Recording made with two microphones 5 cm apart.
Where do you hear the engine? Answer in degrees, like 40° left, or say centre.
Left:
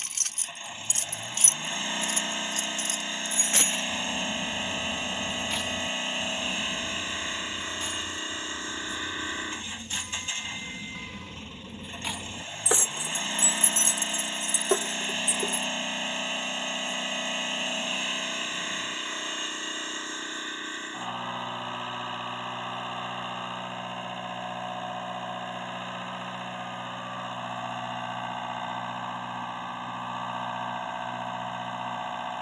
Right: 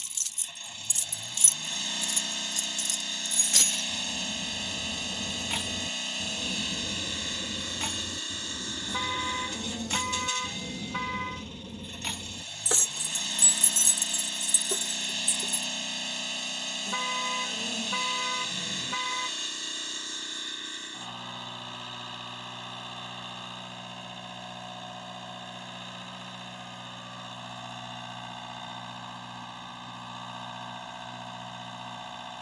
30° left.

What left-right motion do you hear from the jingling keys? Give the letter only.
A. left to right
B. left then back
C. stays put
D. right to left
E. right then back
E.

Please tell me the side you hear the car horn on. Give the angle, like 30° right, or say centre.
60° right.